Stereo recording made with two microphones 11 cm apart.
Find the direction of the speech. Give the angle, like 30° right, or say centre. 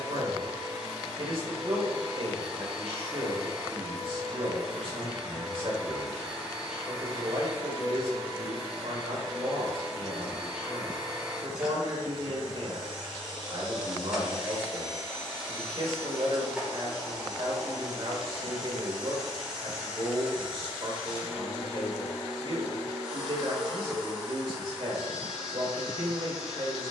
50° right.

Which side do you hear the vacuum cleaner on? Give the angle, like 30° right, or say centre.
10° right.